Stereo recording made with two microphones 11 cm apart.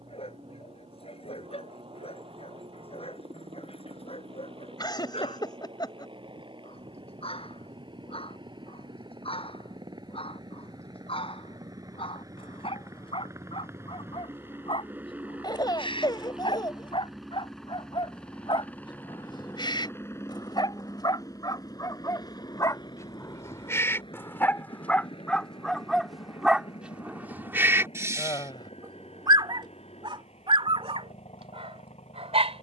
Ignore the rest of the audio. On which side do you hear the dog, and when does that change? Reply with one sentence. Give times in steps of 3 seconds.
In this clip you hear the dog on the left from 0 s, in the centre from 24 s and on the right from 27 s.